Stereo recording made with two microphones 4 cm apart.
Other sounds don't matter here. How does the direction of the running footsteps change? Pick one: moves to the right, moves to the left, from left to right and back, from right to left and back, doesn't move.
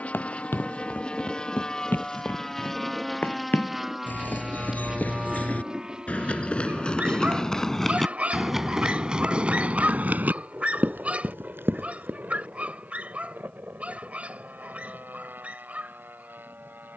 moves to the right.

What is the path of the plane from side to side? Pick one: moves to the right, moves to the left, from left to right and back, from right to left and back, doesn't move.
moves to the right.